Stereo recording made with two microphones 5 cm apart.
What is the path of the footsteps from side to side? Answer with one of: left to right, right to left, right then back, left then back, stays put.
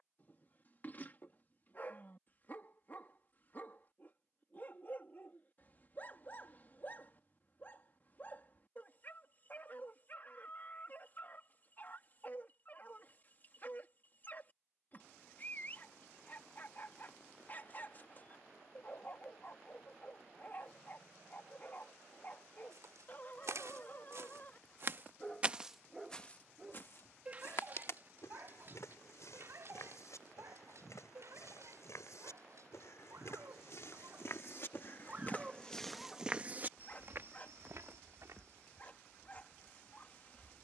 left then back.